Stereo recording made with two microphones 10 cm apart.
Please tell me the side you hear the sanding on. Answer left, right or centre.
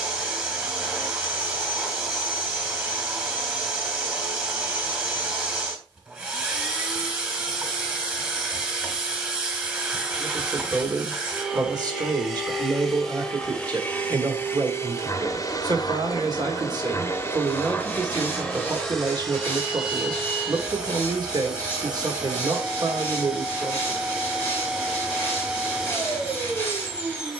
left.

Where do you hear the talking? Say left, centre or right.
right.